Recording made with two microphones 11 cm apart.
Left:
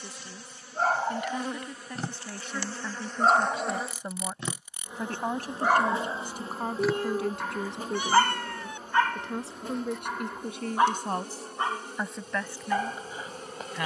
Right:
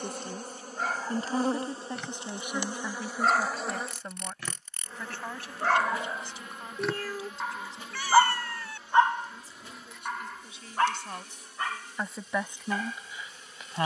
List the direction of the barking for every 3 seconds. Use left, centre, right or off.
left, left, centre, centre, left.